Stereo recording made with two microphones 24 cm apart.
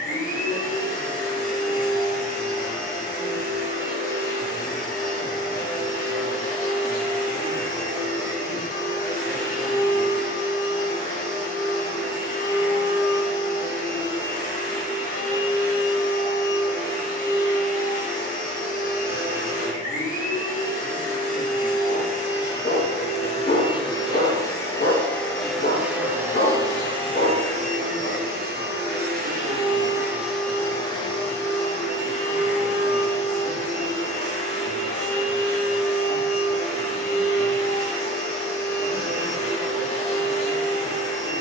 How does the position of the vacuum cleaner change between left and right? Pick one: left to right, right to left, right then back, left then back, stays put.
right then back.